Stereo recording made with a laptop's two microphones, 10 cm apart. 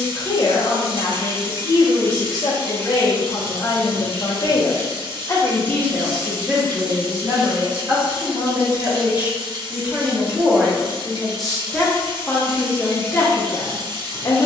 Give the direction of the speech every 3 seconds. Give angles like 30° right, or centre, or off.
40° left, 40° left, 20° right, 10° right, 20° left.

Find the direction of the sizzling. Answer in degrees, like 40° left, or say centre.
60° right.